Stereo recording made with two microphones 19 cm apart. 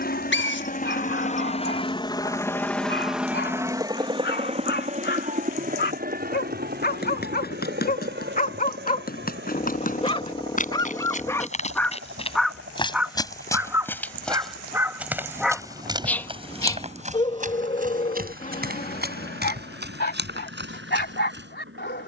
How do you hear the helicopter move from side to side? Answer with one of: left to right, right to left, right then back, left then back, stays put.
left to right.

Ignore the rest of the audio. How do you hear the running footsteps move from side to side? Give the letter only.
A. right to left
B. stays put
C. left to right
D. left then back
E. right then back
C.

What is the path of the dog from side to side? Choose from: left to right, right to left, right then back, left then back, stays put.
right then back.